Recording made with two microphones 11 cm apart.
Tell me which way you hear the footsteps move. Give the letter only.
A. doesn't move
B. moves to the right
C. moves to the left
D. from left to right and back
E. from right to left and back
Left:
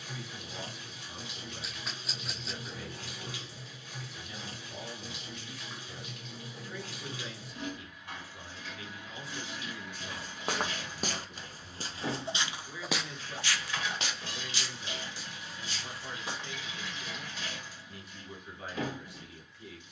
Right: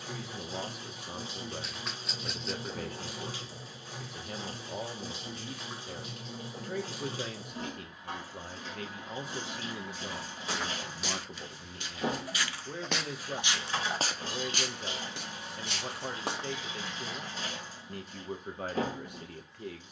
B.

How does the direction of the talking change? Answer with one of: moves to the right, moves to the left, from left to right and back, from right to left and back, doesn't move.
doesn't move.